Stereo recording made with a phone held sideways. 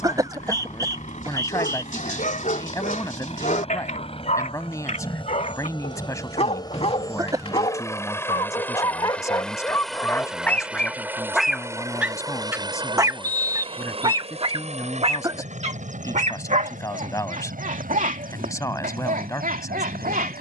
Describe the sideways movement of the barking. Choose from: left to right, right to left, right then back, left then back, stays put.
left to right.